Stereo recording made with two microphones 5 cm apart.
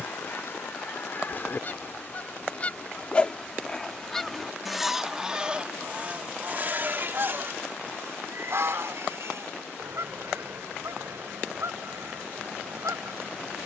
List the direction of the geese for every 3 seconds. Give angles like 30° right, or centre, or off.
40° left, centre, 50° right, 70° right, 80° right.